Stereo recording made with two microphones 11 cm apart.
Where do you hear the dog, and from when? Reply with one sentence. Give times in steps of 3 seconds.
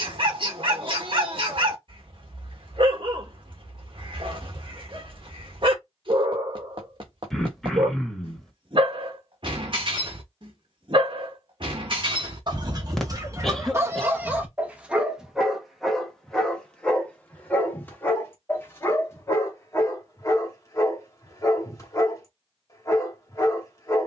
You can hear the dog on the right from 0 s, in the centre from 15 s and on the left from 18 s.